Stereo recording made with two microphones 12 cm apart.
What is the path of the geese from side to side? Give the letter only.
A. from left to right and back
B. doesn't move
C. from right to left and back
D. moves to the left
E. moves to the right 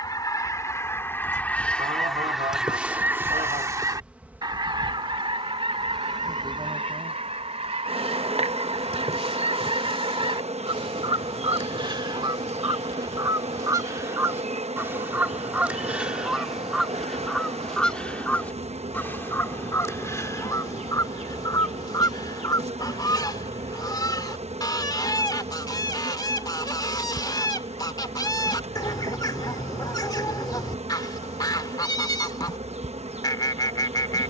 A.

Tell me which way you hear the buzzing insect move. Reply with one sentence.
You can hear the buzzing insect move from left to right.